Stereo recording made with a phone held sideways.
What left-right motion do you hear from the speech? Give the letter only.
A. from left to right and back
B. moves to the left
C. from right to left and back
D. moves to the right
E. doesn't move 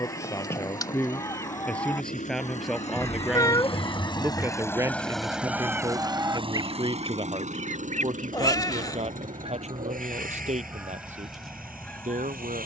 D.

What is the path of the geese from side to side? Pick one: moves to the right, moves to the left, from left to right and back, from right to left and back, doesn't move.
from left to right and back.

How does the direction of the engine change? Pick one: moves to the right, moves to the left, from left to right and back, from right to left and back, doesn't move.
moves to the right.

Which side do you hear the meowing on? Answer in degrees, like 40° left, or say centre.
30° left.